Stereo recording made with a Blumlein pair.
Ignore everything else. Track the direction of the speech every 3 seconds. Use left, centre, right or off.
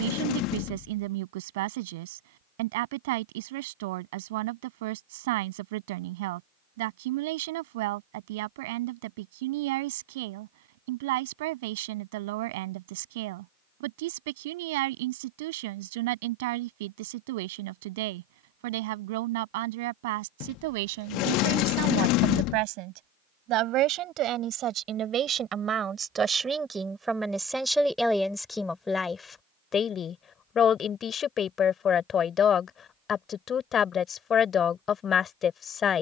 right, right, right, right, right, right, right, right, right, centre, left, left.